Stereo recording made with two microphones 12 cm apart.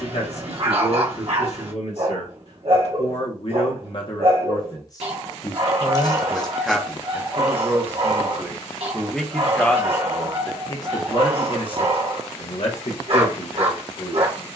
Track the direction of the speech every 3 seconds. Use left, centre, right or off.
left, left, centre, left, left.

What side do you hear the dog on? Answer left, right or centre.
right.